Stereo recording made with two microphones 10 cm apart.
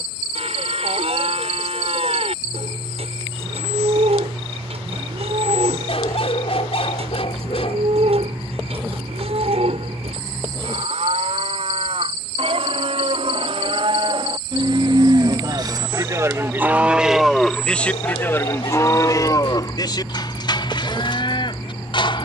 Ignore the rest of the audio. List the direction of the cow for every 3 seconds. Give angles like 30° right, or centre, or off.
80° right, 80° right, 80° right, 80° right, 70° right, 20° right, 40° left, 50° left.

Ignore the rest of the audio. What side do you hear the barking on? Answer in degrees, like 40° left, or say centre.
70° left.